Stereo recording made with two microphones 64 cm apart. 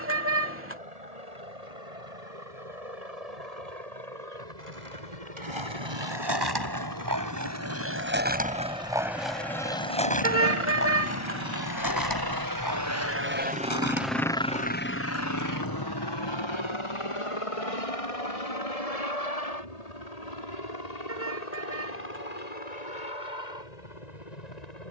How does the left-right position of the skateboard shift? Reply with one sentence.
In this clip you hear the skateboard travel towards the left.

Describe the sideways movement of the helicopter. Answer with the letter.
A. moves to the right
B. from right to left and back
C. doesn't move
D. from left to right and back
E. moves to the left
E.